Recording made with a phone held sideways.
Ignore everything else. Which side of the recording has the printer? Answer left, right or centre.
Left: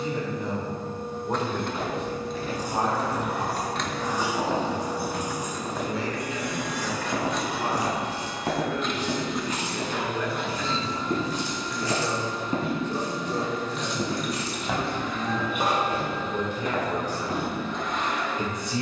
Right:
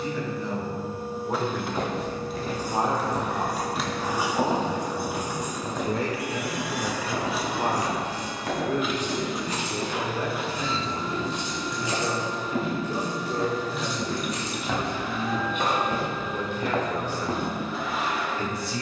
centre.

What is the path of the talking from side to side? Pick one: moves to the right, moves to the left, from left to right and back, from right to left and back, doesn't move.
from left to right and back.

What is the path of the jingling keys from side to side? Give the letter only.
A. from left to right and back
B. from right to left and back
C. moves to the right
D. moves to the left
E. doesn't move
A.